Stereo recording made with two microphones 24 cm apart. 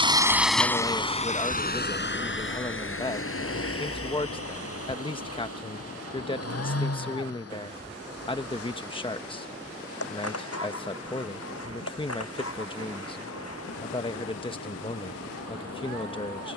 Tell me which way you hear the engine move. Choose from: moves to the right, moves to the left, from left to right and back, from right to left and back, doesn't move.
moves to the left.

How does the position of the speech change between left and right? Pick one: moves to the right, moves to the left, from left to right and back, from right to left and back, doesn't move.
doesn't move.